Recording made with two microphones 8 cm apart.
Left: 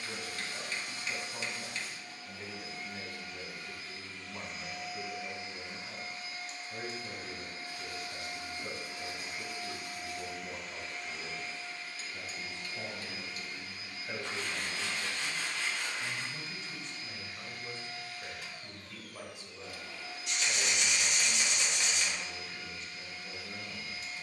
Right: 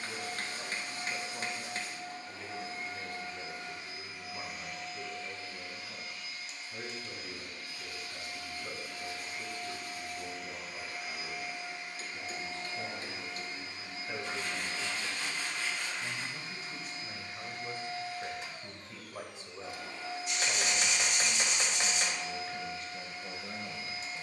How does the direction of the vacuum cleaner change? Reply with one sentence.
You can hear the vacuum cleaner go left and come back.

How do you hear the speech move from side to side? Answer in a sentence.
In this clip you hear the speech go from the left side to the right.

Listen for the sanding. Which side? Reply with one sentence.
You can hear the sanding on the left.